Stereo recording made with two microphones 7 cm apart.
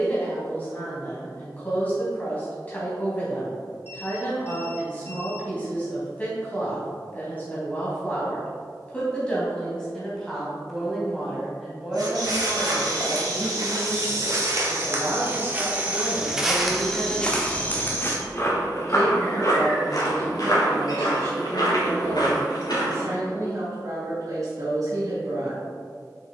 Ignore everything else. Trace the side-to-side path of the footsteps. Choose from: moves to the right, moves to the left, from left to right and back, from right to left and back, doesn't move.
moves to the left.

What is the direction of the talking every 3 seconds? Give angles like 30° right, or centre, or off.
20° left, 20° left, 20° left, centre, 20° right, 40° right, 50° right, 50° right, 50° right.